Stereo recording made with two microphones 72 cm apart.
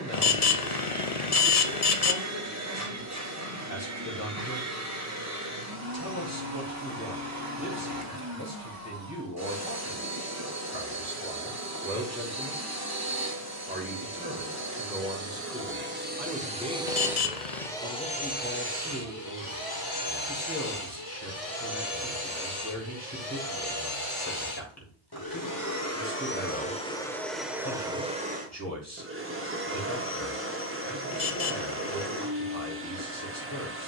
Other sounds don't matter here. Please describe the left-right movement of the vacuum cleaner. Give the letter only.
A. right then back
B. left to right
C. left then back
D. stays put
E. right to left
C.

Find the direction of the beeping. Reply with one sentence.
In this clip you hear the beeping on the left.